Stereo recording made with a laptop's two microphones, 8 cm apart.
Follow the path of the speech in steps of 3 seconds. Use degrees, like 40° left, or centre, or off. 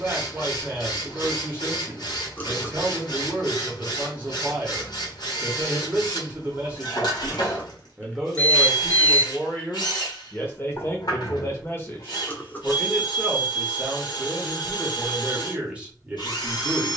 20° right, 20° right, 10° right, 30° left, centre, 20° right.